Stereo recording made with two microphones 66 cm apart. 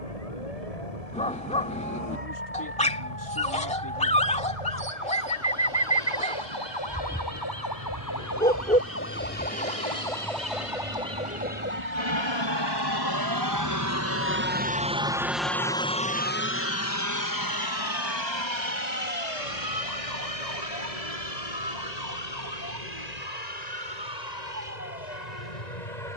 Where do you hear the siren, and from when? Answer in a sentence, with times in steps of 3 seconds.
You can hear the siren on the left from 0 s, in the centre from 9 s and on the right from 12 s.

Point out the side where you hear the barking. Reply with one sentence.
In this clip you hear the barking in the centre.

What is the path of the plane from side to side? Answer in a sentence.
In this clip you hear the plane move from right to left.